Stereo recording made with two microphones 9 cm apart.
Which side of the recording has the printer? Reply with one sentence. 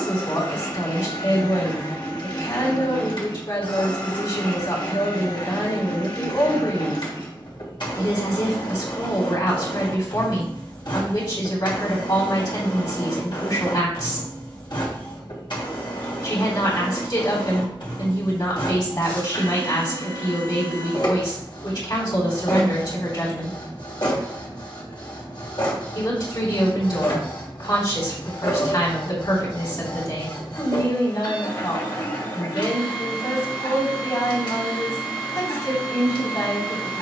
In this clip you hear the printer on the left.